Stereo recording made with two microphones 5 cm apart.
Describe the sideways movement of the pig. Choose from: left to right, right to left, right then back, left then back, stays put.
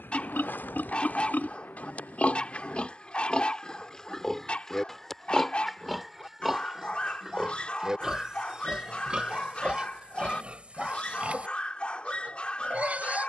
left to right.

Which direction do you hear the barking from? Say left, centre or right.
left.